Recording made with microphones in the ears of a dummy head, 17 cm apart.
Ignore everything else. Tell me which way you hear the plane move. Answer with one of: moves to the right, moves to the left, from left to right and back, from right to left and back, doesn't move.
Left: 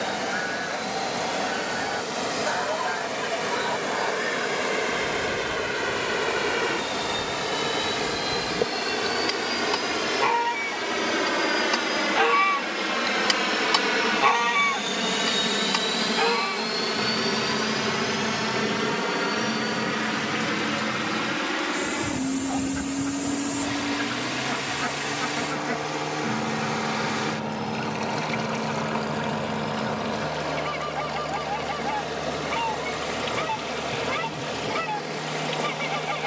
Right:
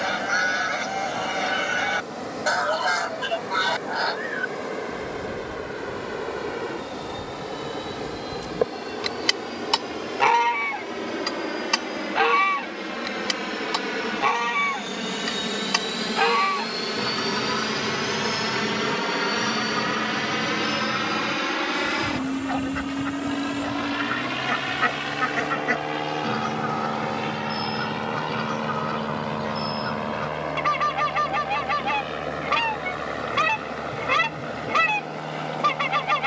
moves to the right.